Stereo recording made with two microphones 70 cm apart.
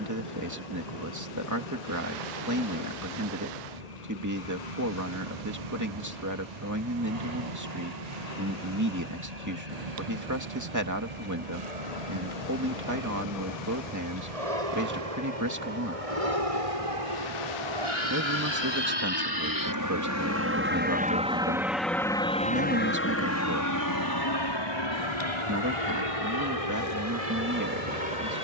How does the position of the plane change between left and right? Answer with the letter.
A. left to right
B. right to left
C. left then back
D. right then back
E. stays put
B.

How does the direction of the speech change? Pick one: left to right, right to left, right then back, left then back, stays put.
stays put.